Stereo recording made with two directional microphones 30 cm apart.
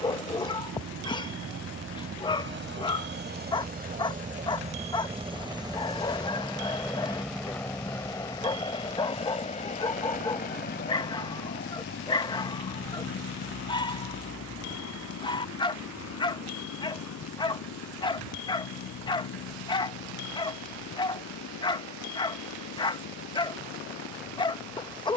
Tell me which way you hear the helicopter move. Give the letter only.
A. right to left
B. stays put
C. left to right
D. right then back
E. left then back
A.